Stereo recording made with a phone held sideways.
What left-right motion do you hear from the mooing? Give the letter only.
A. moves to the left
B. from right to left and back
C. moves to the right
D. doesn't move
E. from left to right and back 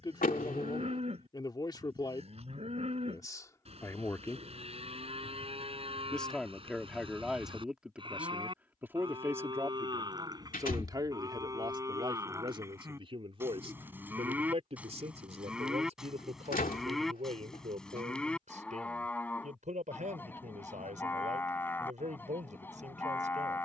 A.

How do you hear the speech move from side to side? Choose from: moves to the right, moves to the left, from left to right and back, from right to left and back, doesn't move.
moves to the right.